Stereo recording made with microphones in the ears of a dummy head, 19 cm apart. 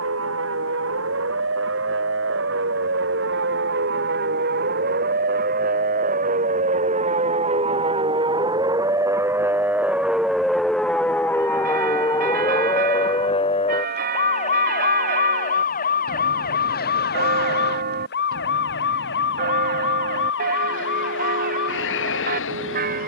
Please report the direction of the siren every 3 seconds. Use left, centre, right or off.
right, right, right, centre, left, left, left, left.